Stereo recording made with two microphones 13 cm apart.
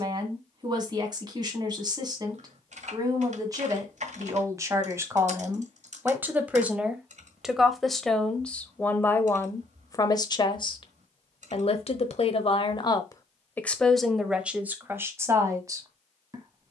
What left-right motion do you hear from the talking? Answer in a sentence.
You can hear the talking move from right to left and back again.